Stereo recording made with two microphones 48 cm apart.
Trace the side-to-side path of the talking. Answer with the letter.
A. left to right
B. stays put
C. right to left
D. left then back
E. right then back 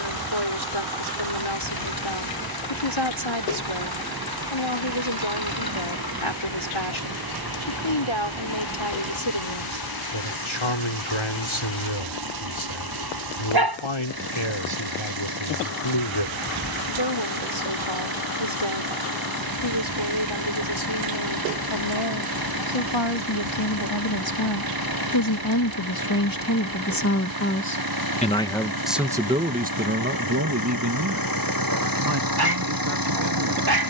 A.